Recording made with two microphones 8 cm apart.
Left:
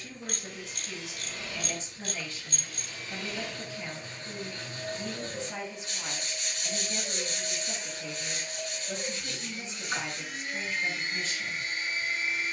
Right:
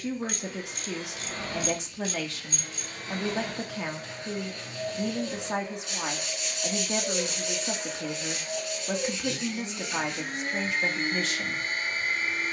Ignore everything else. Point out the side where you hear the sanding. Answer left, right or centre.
left.